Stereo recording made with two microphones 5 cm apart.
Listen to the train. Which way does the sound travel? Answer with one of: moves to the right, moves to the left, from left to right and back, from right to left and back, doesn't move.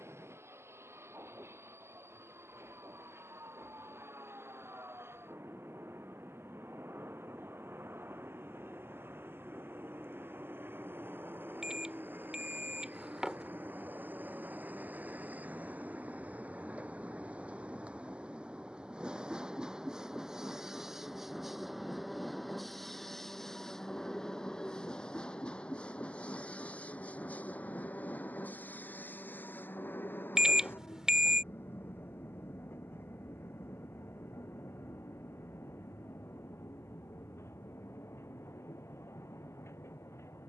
moves to the left.